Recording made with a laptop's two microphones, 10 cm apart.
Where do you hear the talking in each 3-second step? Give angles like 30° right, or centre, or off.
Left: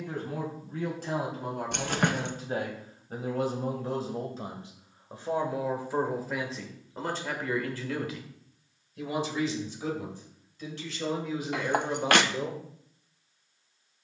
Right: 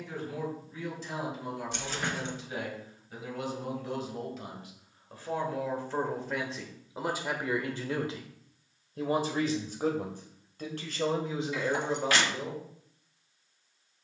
50° left, 30° left, 10° right, 40° right, 20° left.